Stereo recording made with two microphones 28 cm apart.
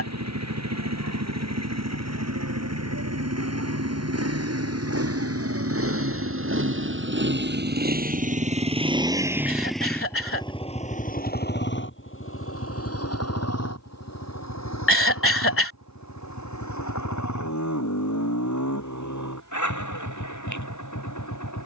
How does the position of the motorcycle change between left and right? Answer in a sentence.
In this clip you hear the motorcycle travel towards the left.